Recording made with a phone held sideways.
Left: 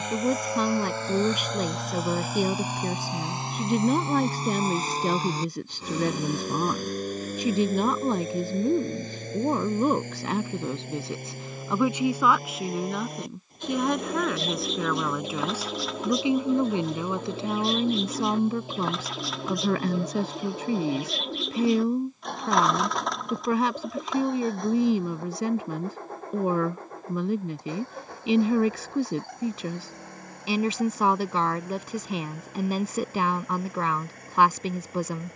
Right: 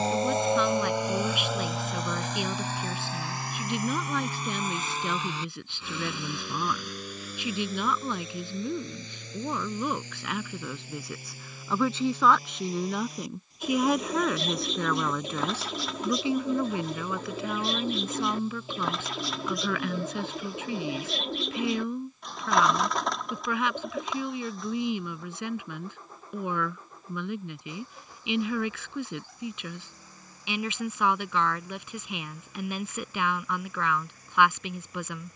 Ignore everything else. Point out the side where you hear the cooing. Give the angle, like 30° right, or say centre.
centre.